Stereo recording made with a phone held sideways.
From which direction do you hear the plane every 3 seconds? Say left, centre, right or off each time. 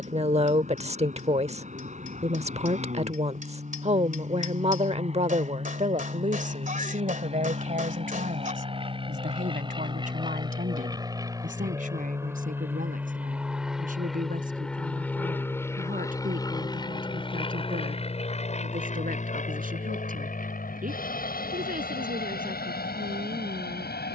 right, right, right, right, centre, left, left, left.